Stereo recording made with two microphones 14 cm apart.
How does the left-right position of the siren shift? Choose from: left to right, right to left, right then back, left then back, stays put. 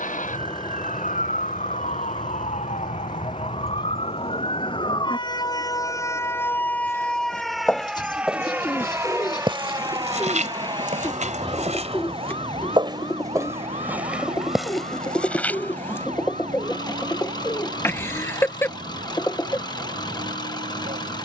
left to right.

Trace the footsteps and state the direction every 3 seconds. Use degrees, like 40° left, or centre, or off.
off, off, centre, 50° right, 20° right, 10° left, off.